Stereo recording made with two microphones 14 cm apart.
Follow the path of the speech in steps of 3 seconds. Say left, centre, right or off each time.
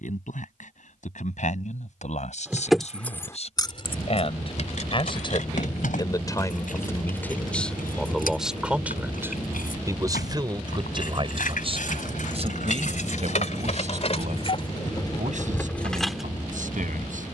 left, left, centre, right, right, right.